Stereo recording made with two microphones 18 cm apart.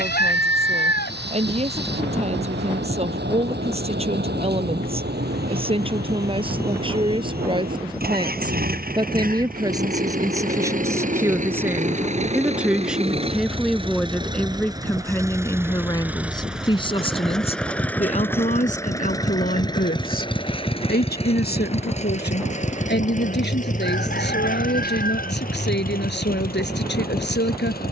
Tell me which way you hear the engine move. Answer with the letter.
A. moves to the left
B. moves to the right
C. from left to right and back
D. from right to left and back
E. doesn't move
A.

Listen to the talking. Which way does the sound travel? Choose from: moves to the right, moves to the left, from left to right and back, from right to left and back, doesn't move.
moves to the left.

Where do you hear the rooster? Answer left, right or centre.
left.